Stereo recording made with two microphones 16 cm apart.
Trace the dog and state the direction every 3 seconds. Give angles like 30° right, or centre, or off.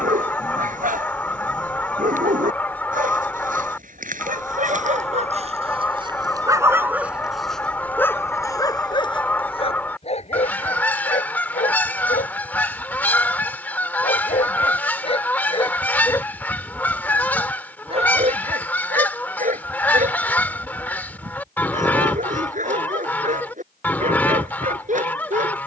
60° right, 50° right, centre, 40° left, 50° left, centre, 50° right, 50° right, 50° right.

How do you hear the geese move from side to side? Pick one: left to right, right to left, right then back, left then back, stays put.
stays put.